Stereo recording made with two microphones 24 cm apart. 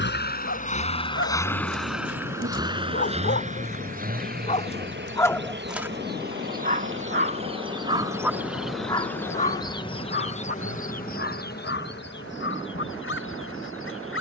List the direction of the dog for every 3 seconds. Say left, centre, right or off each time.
left, left, right, left, left.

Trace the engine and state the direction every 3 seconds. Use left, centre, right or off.
centre, right, right, right, right.